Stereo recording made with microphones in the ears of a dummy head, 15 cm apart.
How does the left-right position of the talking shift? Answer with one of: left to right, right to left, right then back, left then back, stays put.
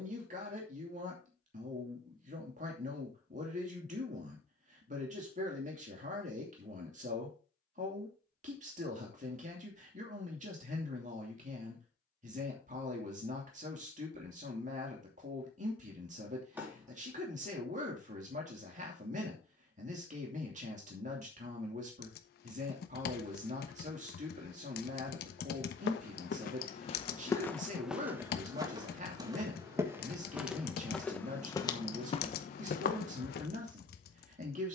stays put.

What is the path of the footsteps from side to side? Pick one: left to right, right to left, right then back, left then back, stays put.
right then back.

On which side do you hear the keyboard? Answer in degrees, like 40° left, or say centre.
60° left.